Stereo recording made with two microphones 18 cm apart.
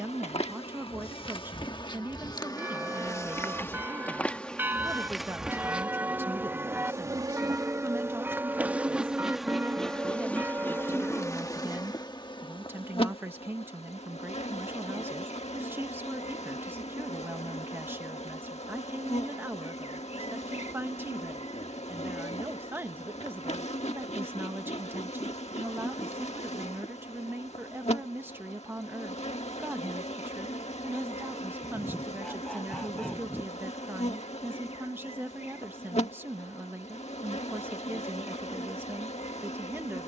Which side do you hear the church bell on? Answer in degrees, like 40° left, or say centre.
10° right.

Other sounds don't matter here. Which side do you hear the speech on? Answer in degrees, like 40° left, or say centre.
10° right.